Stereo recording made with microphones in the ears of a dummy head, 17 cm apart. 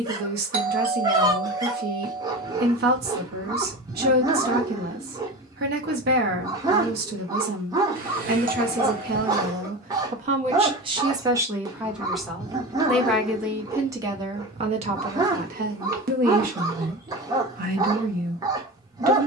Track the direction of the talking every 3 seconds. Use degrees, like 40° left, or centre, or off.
50° right, 50° right, 50° right, 30° right, 10° right, 50° right, 50° right.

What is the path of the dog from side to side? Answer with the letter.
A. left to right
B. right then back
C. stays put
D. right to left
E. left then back
C.